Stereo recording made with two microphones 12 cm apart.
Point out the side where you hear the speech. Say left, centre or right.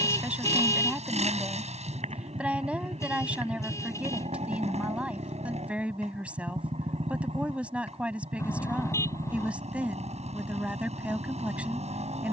centre.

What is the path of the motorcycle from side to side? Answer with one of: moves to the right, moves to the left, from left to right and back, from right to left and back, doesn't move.
doesn't move.